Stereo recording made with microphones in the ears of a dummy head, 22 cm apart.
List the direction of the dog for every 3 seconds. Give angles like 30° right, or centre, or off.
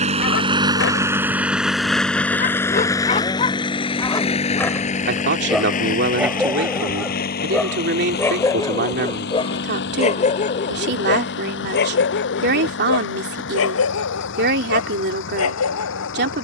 50° left, 20° left, 10° left, 30° left, 60° left, 80° left.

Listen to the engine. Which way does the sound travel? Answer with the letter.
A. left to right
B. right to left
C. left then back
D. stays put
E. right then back
B.